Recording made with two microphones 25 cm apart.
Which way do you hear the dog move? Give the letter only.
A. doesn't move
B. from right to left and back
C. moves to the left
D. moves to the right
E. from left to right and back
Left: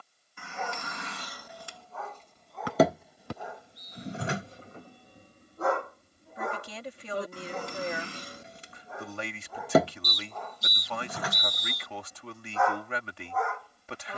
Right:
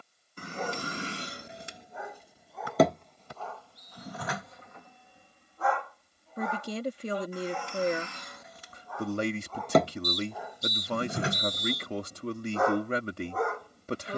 B.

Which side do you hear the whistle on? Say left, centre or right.
left.